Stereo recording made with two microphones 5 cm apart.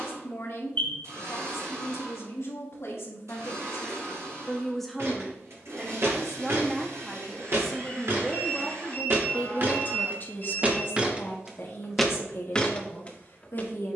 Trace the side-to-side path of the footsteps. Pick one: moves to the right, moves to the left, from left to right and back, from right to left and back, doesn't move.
moves to the left.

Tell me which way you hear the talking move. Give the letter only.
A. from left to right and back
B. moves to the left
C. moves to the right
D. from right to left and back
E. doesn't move
A.